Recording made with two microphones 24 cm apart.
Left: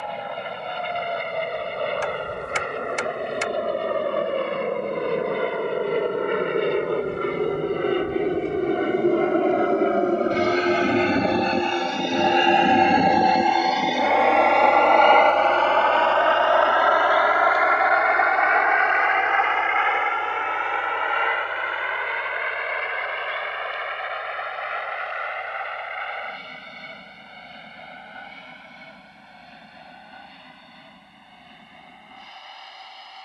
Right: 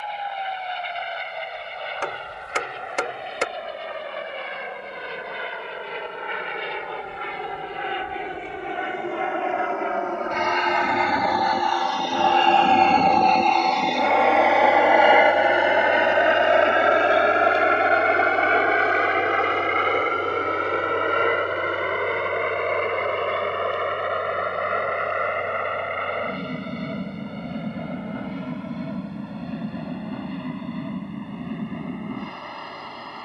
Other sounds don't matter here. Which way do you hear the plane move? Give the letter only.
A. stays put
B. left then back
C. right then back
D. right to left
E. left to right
E.